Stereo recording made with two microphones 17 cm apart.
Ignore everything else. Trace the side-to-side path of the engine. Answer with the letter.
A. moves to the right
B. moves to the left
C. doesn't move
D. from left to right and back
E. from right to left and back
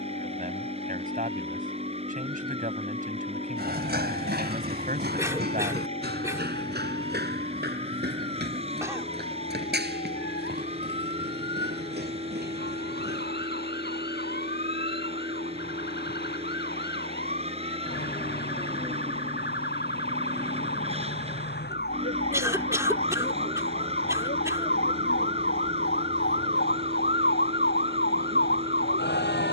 C.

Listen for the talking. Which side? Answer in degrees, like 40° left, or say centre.
50° right.